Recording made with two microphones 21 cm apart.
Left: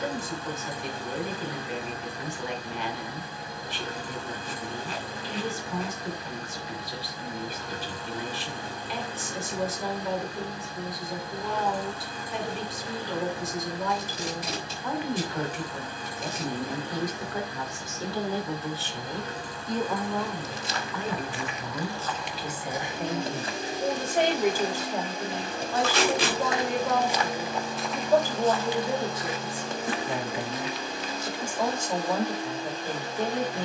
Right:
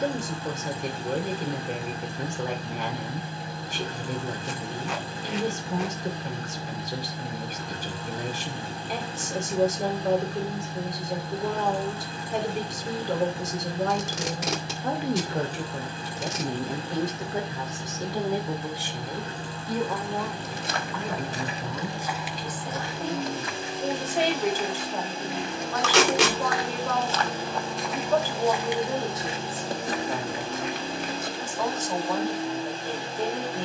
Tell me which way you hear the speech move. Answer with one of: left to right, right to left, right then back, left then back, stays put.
right to left.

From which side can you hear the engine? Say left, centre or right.
right.